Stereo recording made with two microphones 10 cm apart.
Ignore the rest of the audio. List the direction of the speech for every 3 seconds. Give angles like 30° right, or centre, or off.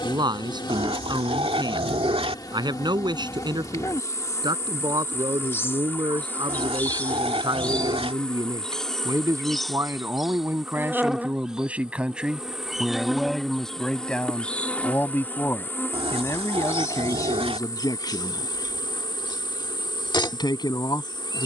40° right, 40° right, 40° right, 20° right, centre, 30° left, 40° left.